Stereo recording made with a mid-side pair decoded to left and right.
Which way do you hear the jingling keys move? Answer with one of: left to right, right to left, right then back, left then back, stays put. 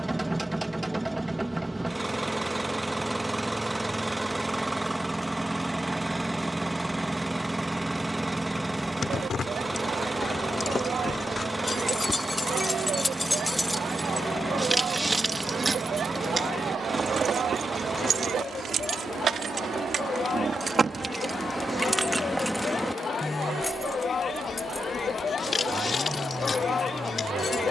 right then back.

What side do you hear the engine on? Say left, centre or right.
centre.